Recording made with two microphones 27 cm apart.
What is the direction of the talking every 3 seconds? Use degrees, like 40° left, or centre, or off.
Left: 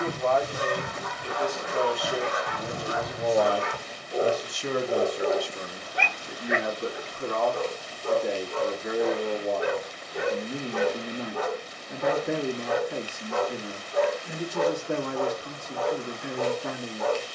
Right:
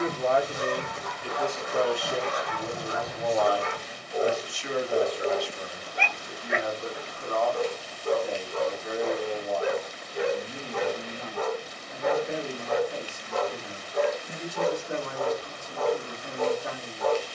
centre, 40° left, 70° left, 70° left, 70° left, 70° left.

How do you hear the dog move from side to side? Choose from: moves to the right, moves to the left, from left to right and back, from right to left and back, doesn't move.
doesn't move.